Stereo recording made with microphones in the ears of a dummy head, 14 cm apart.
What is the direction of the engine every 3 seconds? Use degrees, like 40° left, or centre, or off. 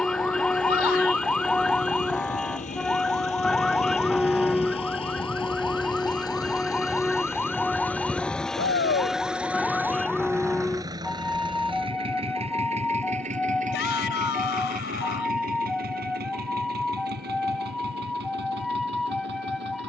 50° left, 40° left, 10° left, 20° right, 50° right, 60° right, 70° right.